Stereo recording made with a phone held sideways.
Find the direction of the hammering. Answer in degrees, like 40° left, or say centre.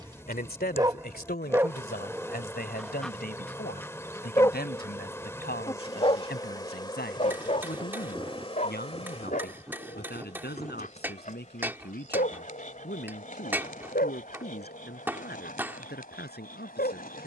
10° right.